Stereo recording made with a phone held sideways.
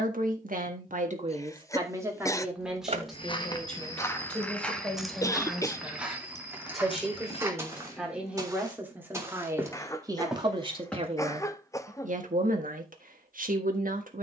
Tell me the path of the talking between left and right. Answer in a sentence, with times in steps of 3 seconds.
You can hear the talking on the right from 0 s, in the centre from 3 s and on the right from 9 s.